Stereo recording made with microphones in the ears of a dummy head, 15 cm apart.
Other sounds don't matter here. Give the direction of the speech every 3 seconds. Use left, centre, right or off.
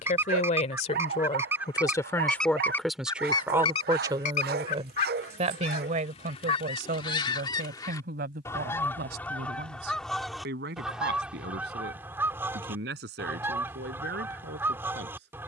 left, right, right, right, right.